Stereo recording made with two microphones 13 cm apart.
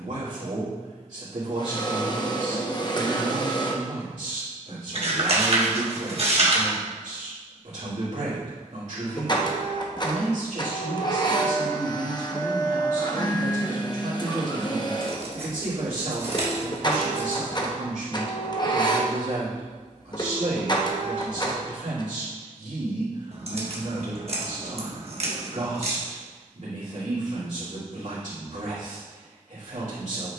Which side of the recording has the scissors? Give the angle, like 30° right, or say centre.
50° right.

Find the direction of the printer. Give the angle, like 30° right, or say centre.
30° left.